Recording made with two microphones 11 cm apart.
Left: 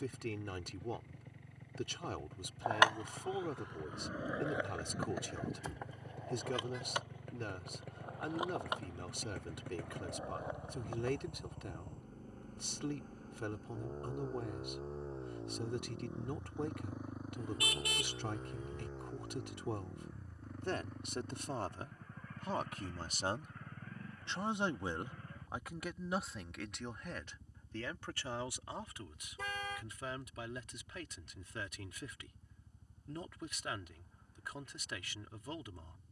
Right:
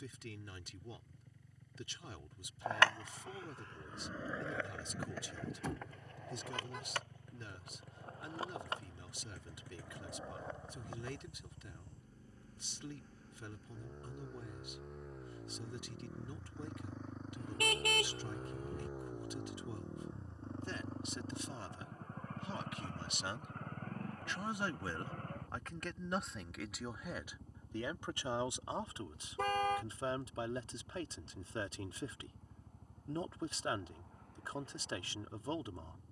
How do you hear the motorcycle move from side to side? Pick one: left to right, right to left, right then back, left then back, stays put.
left to right.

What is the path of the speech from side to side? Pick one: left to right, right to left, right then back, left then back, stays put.
left to right.